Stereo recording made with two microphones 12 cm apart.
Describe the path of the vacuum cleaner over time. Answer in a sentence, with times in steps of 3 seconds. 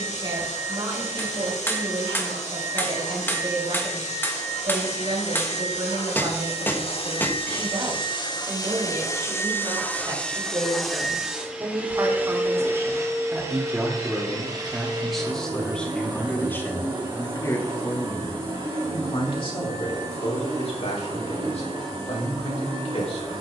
You can hear the vacuum cleaner on the left from 0 s, in the centre from 9 s and on the right from 12 s.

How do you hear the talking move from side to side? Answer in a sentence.
You can hear the talking go from the right side to the left.